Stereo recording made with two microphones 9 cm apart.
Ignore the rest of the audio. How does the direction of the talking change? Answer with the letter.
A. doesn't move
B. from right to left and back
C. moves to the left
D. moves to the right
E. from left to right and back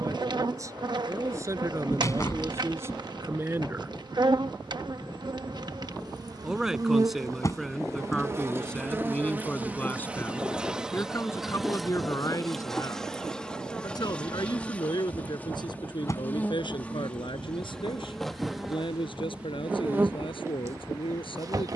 C.